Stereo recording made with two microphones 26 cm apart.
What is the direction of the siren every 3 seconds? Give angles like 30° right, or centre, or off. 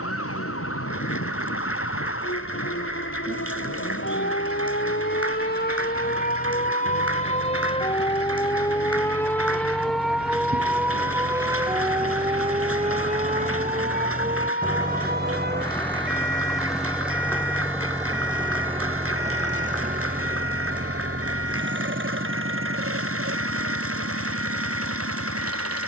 60° left, 50° left, 20° left, centre, 30° right, 40° right, 50° right, 60° right, 60° right.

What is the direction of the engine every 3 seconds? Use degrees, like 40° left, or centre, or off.
60° left, 50° left, 50° left, 40° left, 20° left, centre, 30° right, 50° right, 60° right.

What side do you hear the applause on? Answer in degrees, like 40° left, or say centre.
60° right.